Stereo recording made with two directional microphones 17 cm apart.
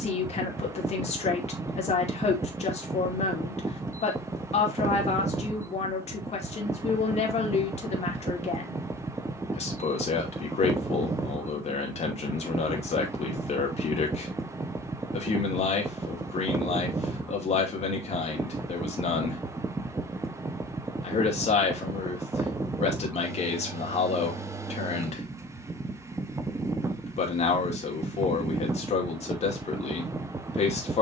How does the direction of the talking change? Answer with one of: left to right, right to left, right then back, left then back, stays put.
stays put.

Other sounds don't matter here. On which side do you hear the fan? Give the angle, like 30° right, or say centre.
20° right.